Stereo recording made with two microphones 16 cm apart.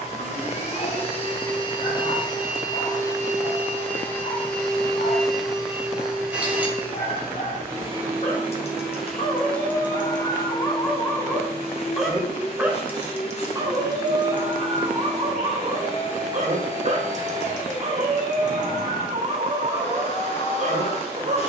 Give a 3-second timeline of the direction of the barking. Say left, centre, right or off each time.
left, left, left, left, right, right, right.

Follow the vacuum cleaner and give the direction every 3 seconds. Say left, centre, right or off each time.
left, centre, centre, left, left, left, left.